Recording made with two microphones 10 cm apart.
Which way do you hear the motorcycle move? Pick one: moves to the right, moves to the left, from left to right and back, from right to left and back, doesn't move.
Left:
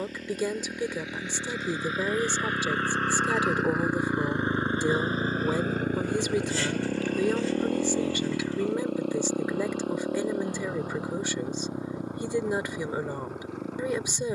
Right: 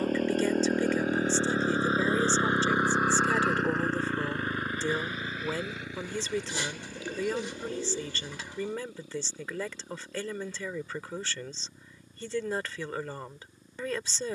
moves to the left.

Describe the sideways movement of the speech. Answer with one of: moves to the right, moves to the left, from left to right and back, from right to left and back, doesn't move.
doesn't move.